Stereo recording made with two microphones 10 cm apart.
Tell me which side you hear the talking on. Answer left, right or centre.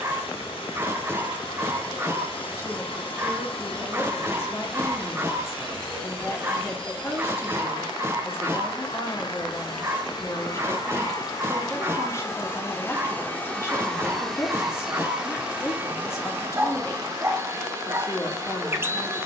left.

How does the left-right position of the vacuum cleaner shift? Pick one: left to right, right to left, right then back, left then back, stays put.
left to right.